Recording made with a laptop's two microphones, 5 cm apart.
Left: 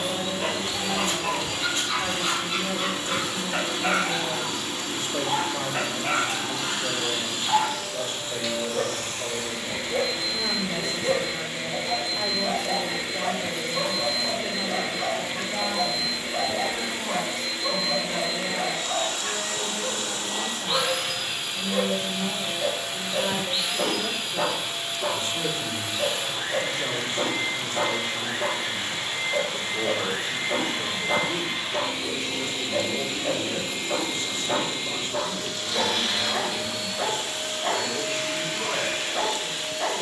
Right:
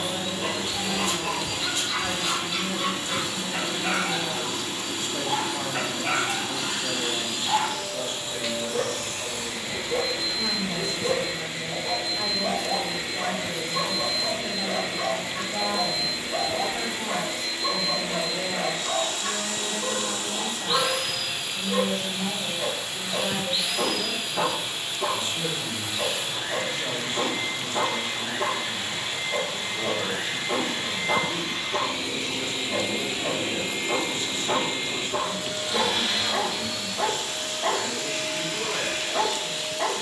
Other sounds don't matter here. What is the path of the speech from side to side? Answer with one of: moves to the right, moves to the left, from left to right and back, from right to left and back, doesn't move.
from left to right and back.